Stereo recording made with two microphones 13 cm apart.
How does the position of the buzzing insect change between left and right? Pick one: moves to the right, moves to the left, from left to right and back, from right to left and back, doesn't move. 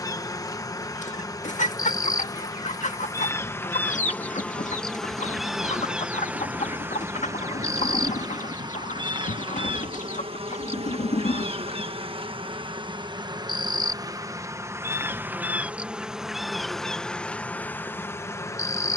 from left to right and back.